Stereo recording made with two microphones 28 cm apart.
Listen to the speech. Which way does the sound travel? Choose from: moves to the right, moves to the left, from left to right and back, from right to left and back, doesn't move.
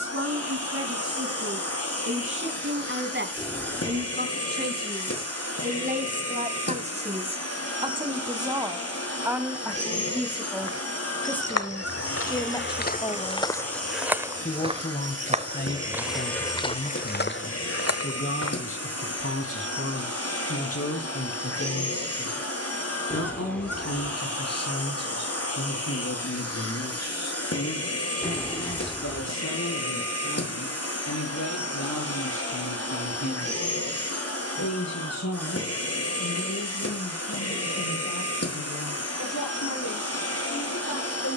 moves to the left.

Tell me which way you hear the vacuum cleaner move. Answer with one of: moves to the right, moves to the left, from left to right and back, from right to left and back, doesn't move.
doesn't move.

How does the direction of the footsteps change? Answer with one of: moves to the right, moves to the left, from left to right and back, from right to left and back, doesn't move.
from left to right and back.